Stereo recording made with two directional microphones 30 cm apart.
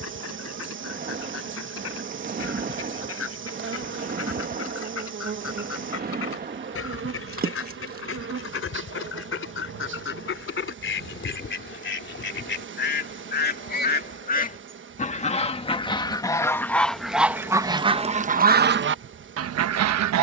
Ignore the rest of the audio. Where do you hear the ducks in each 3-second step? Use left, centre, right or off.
left, left, left, left, left, centre, right.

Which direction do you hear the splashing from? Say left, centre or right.
right.